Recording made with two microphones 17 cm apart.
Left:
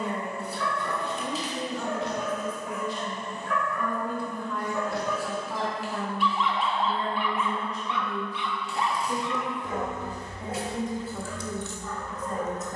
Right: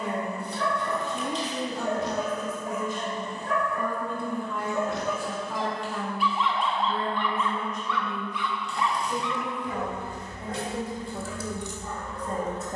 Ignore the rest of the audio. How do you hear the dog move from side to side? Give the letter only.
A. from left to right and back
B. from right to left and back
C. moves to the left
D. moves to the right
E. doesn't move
B.